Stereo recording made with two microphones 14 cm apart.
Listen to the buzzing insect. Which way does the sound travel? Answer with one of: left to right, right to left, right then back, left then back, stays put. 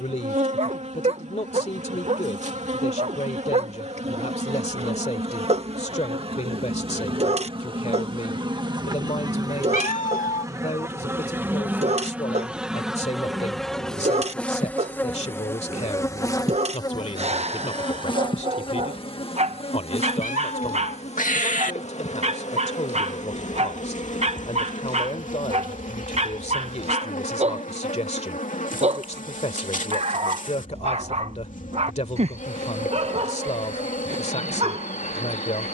right to left.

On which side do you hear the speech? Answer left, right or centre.
left.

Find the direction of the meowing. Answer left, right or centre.
left.